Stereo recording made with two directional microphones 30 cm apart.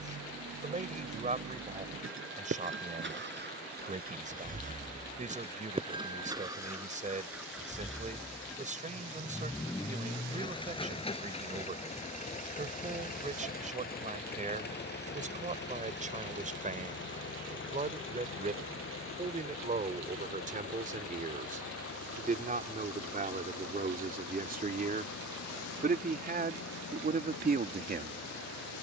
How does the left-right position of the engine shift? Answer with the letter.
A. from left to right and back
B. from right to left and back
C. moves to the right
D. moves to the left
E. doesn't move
D.